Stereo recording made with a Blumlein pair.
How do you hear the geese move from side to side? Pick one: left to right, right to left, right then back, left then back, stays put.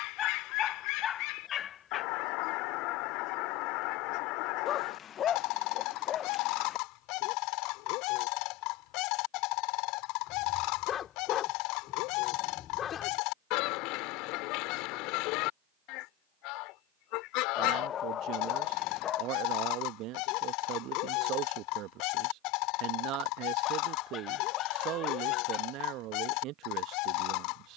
stays put.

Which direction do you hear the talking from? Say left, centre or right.
right.